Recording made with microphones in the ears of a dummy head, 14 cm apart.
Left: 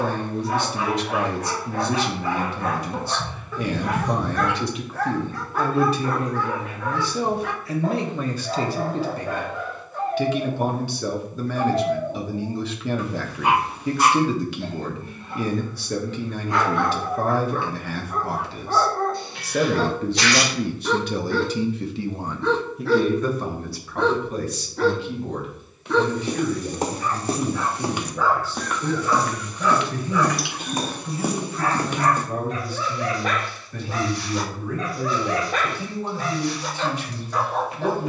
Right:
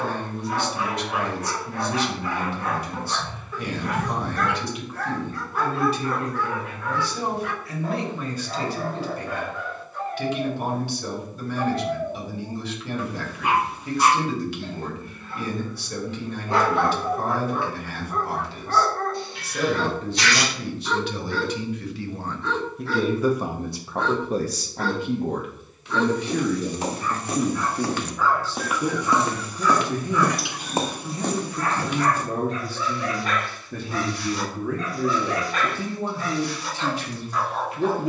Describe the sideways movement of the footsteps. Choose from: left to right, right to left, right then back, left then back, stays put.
right then back.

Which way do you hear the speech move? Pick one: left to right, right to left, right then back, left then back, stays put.
left to right.